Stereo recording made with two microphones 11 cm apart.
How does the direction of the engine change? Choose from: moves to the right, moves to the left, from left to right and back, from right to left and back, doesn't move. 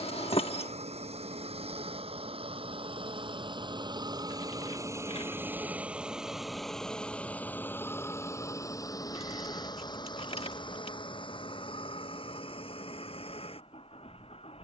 moves to the left.